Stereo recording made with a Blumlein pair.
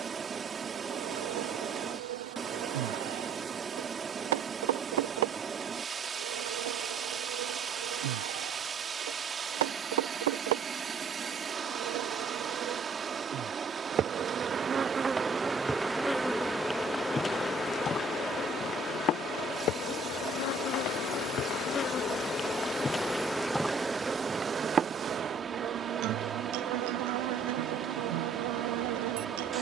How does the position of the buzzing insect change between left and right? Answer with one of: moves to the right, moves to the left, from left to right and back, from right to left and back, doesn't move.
from right to left and back.